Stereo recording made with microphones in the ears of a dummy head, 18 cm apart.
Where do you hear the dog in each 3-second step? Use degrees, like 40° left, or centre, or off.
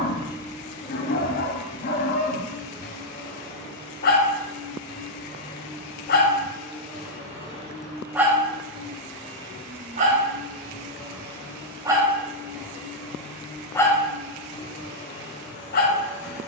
40° left, 40° left, 10° left, 30° right, 10° left, 40° left.